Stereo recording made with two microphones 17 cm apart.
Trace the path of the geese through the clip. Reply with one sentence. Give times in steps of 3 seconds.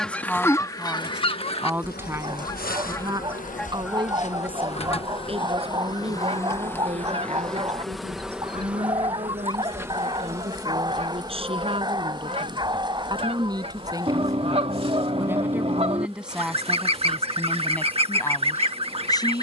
In this clip you hear the geese on the left from 0 s, in the centre from 3 s and on the right from 6 s.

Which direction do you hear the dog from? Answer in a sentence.
You can hear the dog on the right.